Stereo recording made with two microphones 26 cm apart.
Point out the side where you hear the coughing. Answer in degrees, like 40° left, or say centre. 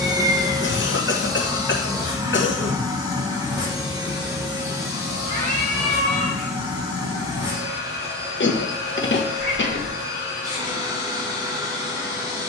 50° left.